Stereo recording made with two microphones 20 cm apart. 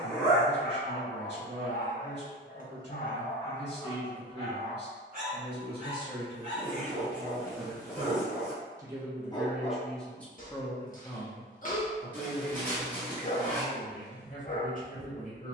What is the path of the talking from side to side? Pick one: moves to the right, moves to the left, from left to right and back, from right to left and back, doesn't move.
moves to the left.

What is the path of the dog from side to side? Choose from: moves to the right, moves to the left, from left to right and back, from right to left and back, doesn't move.
from left to right and back.